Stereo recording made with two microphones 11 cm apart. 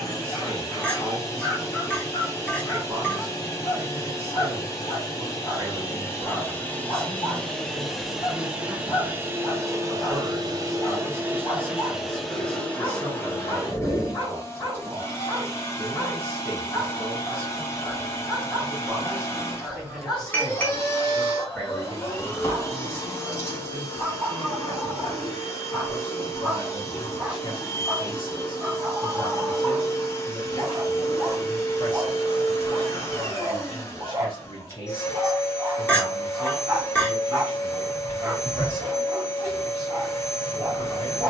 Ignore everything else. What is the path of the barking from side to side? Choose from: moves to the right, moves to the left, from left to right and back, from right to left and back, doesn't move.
moves to the right.